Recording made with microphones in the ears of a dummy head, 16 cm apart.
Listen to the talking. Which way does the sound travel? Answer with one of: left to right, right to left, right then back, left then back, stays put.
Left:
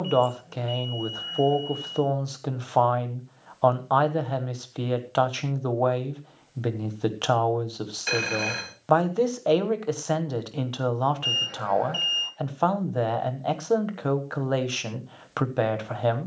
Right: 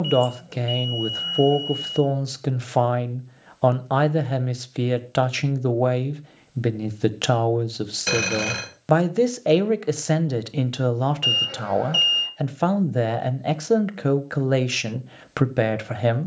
stays put.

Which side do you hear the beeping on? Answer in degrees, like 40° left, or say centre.
60° right.